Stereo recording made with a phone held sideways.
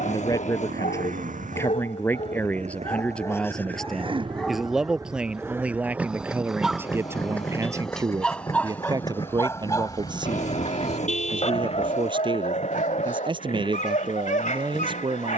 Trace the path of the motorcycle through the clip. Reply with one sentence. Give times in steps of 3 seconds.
In this clip you hear the motorcycle on the right from 0 s, in the centre from 6 s and on the left from 9 s.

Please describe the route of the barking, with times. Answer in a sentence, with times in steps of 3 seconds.
You can hear the barking on the left from 0 s, in the centre from 3 s and on the left from 9 s.